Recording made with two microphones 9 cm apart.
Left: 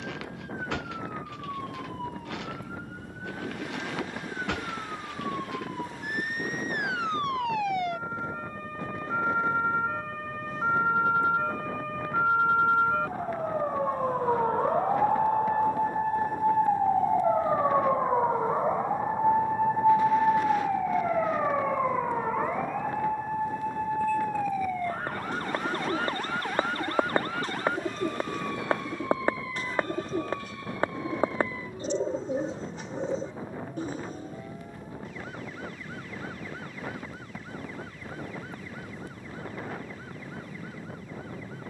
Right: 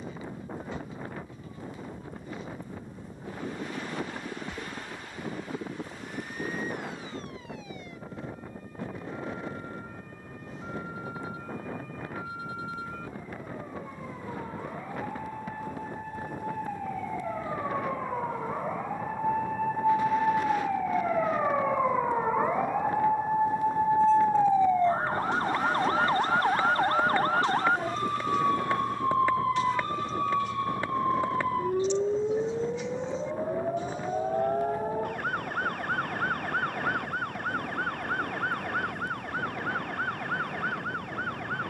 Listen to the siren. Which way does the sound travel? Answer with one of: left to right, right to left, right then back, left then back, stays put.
left to right.